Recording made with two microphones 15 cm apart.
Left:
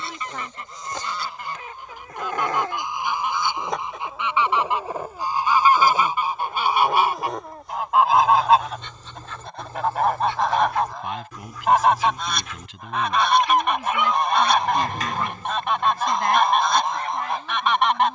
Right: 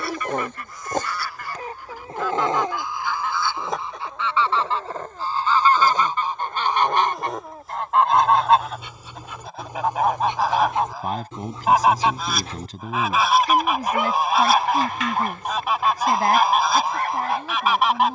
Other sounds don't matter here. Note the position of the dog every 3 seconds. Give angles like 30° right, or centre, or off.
40° right, centre, centre, 20° right, 40° right, 60° right.